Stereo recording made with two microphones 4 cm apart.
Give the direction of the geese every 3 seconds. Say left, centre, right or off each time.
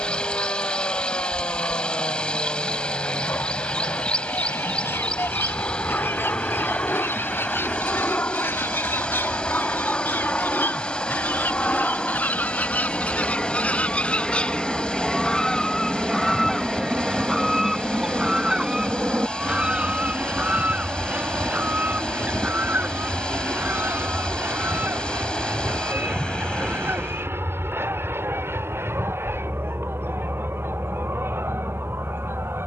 left, left, left, left, left, centre, right, right, right, right, right.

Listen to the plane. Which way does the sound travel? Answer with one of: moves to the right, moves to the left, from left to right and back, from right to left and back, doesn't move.
moves to the right.